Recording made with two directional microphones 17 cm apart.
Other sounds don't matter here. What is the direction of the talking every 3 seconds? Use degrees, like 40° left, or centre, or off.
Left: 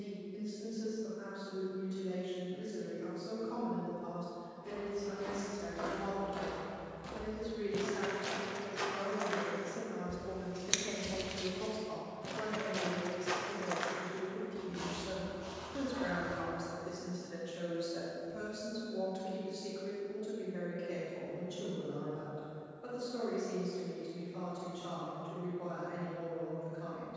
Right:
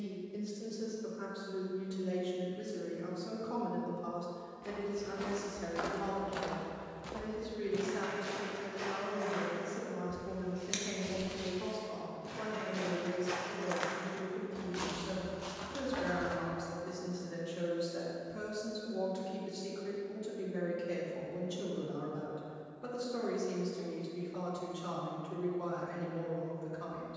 40° right, 30° right, 10° right, 10° left, 20° left, centre, 20° right, 30° right, 40° right.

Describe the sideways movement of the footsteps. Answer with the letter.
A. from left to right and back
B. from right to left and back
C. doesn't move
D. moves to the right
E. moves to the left
B.